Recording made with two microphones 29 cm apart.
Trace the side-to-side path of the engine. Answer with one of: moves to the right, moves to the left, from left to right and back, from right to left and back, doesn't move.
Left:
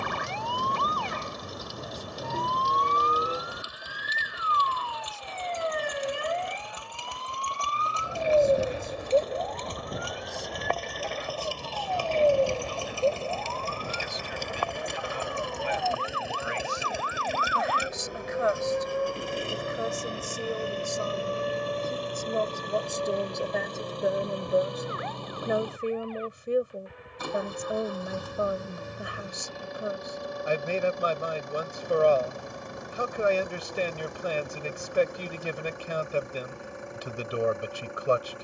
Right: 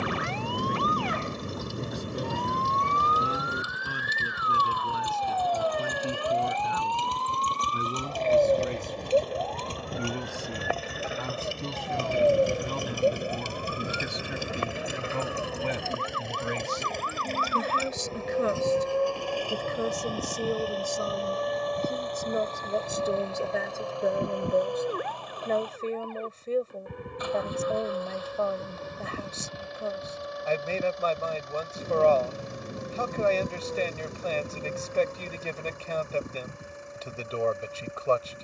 moves to the left.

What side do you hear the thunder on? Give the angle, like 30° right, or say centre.
30° right.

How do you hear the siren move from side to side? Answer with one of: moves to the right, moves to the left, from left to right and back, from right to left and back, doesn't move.
moves to the right.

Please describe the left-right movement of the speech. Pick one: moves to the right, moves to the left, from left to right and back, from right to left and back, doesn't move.
moves to the left.